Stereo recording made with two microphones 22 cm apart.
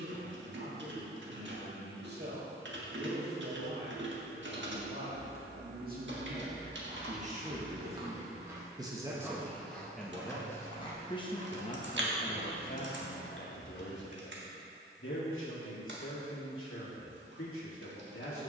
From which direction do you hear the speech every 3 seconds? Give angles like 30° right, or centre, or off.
50° right, 50° right, 30° right, 10° left, 50° left, 70° left.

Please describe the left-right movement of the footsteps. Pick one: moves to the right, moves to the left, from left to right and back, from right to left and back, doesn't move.
moves to the left.